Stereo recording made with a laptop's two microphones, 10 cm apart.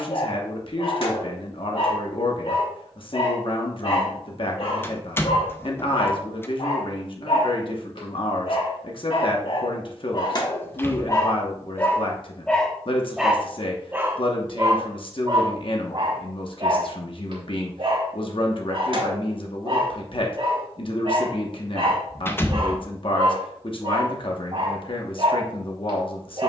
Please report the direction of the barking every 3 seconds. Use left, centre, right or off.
left, left, left, left, centre, right, right, right, right.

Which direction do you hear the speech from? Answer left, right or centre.
left.